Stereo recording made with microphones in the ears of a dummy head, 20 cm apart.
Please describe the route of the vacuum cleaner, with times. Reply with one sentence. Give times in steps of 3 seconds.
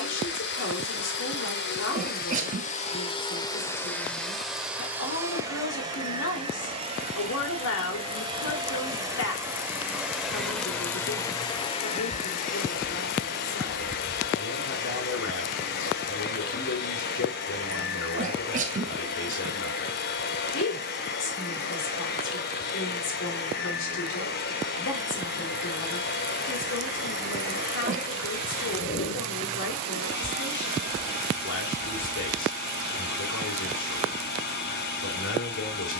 In this clip you hear the vacuum cleaner on the left from 0 s, in the centre from 3 s, on the right from 6 s, in the centre from 9 s and on the left from 12 s.